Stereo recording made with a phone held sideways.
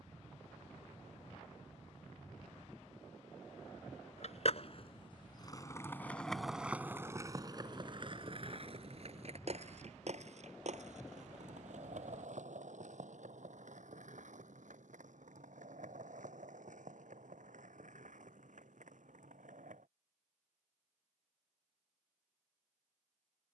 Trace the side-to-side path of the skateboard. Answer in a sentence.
You can hear the skateboard travel towards the right.